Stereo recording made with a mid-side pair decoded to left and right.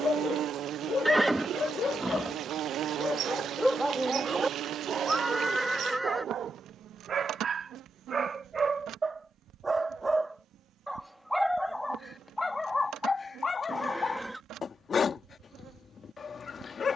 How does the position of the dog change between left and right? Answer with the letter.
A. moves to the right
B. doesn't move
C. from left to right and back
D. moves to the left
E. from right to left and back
C.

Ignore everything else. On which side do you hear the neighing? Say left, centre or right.
centre.